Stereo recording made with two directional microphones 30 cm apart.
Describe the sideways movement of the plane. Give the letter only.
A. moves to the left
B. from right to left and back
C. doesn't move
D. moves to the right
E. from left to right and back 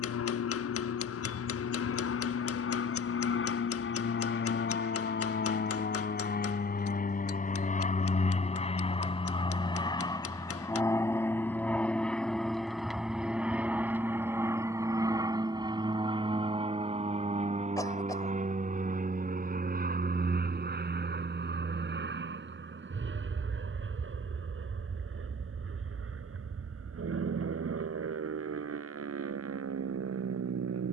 D.